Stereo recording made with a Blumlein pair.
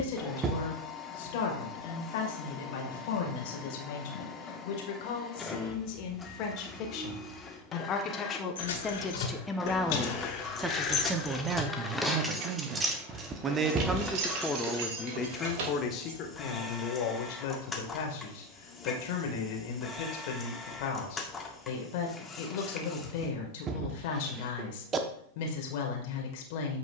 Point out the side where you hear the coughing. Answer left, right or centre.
right.